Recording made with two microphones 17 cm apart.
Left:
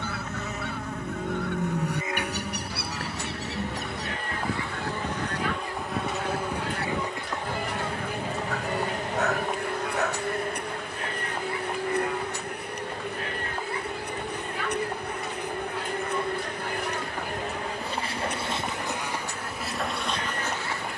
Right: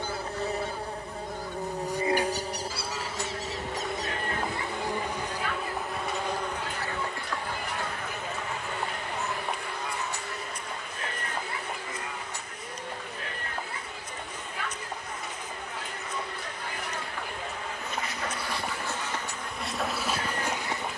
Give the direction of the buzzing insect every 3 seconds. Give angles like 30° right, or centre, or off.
30° right, 20° right, 20° left, 50° left, 60° left, 50° left, 10° left.